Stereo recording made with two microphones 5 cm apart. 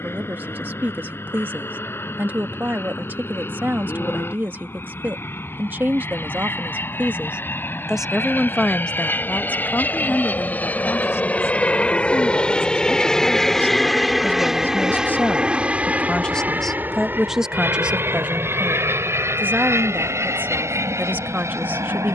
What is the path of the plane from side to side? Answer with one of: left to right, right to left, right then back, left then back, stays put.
left to right.